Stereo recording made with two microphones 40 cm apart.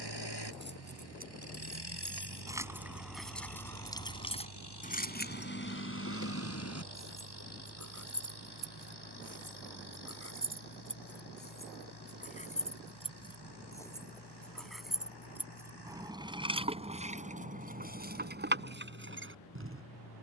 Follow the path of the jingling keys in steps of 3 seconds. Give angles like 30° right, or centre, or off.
20° right, 20° left, 40° left, 30° left, 10° left, 10° right, 30° right.